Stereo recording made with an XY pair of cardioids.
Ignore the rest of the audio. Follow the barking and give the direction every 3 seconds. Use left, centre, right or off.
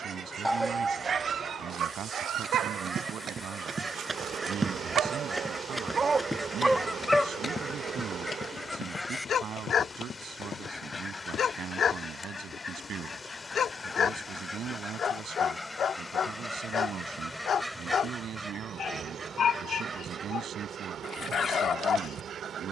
right, right, centre, left, left, left, left, left.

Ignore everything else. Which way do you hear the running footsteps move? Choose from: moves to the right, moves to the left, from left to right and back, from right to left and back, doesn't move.
moves to the left.